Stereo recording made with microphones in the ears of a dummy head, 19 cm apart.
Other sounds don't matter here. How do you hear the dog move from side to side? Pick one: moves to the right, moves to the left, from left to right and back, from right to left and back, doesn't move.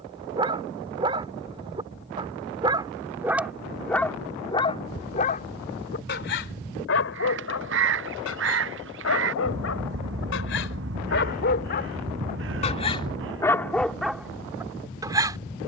from right to left and back.